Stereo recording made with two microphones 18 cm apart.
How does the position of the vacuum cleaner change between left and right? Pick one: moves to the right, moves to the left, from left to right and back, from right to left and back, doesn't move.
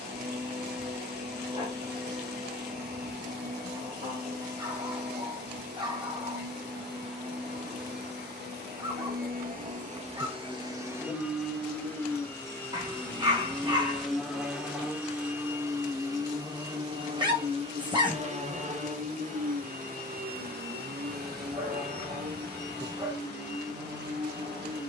from right to left and back.